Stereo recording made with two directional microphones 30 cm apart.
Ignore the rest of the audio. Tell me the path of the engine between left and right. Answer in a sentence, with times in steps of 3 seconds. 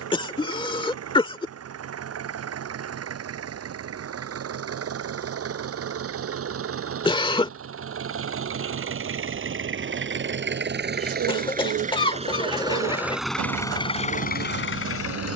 You can hear the engine on the right from 0 s and in the centre from 12 s.